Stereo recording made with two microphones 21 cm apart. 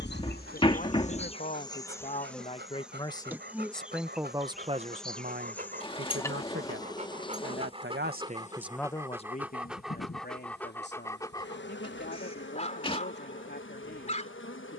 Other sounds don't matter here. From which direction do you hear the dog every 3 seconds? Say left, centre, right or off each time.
right, right, right, centre, left.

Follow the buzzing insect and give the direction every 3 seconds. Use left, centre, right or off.
left, centre, left, left, left.